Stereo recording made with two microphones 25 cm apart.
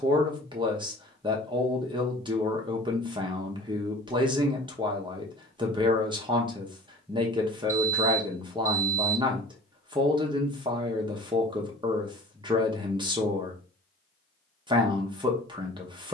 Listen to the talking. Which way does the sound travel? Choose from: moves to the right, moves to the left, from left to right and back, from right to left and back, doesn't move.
doesn't move.